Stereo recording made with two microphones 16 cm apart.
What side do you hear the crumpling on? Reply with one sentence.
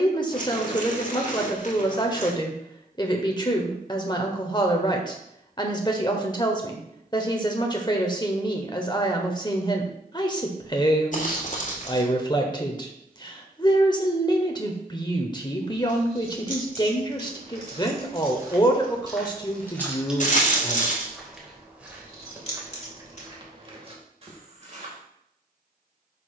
In this clip you hear the crumpling on the left.